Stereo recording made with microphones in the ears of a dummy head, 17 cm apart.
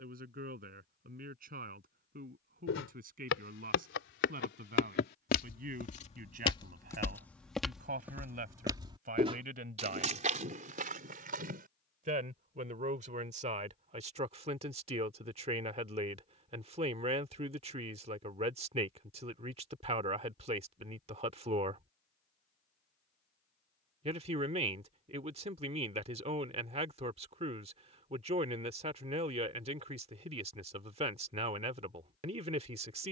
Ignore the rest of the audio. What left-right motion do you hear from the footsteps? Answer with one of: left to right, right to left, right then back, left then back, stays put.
left to right.